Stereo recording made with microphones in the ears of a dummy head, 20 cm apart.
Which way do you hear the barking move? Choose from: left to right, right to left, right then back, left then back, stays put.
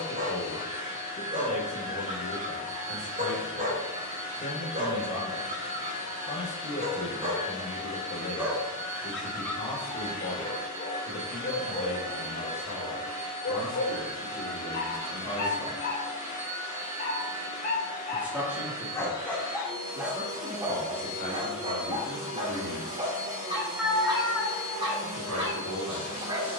left then back.